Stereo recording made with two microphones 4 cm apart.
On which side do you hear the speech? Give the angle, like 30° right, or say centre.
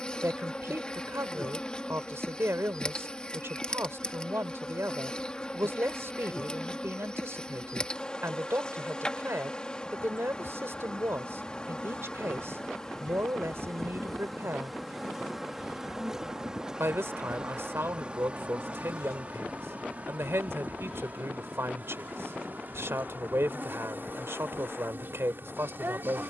70° right.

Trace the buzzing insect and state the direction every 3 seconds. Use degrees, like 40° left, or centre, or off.
20° left, 20° left, 20° left, 20° left, 10° left, 20° right, 40° right, 50° right, 50° right.